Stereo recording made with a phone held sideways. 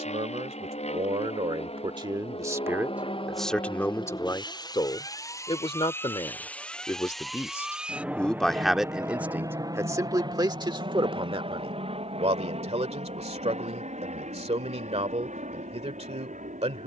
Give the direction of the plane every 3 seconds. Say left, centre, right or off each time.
left, left, centre, right, right, right.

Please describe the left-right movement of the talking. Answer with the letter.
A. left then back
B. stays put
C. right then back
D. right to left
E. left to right
A.